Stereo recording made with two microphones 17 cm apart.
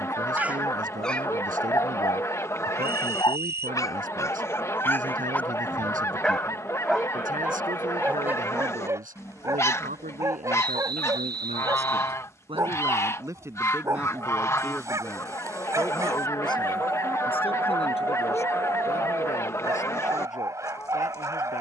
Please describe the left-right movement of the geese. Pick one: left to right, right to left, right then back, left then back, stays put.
stays put.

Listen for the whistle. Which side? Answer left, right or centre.
right.